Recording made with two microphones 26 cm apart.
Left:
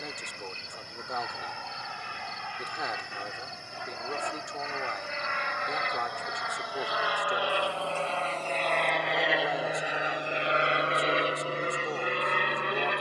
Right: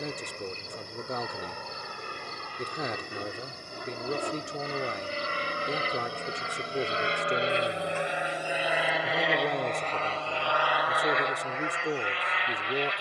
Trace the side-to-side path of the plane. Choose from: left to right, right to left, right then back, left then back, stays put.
right to left.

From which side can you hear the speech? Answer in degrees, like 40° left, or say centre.
30° right.